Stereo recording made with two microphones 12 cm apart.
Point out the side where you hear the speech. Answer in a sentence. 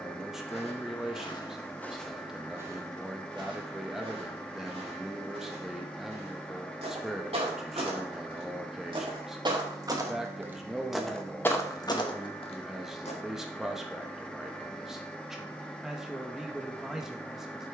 In this clip you hear the speech in the centre.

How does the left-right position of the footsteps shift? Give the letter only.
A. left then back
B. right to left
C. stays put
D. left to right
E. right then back
E.